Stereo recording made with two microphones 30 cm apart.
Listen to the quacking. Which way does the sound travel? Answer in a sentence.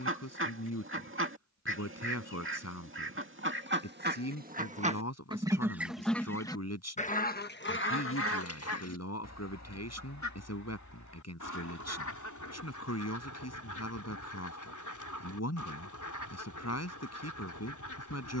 In this clip you hear the quacking go from the right side to the left.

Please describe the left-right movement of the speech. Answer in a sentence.
You can hear the speech stay in one place.